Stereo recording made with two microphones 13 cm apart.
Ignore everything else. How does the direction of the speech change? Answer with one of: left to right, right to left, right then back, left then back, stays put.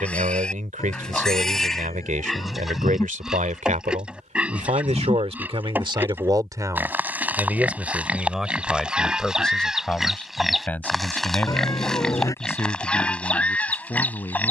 right to left.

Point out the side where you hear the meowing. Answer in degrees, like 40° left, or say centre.
20° left.